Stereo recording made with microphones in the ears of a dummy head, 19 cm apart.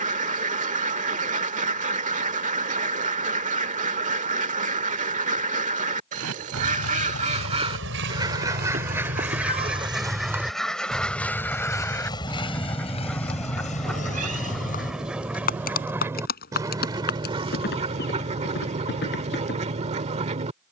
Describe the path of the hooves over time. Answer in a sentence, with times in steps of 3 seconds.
In this clip you hear the hooves not at all from 0 s, on the right from 6 s, in the centre from 9 s and on the left from 12 s.